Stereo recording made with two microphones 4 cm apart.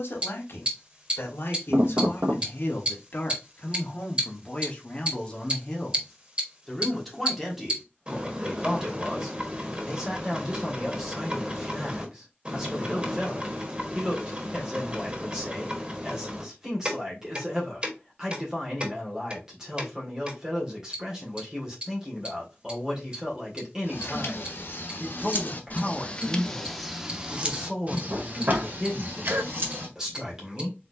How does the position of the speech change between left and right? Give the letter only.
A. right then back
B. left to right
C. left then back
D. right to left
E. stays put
B.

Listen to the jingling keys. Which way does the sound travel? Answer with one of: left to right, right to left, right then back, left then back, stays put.
left to right.